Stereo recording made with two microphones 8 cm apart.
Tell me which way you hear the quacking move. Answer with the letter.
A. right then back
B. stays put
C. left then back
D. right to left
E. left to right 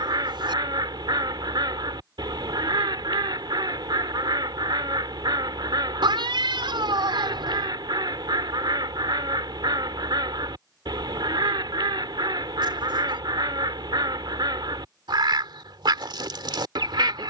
B.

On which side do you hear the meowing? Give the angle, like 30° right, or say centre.
80° right.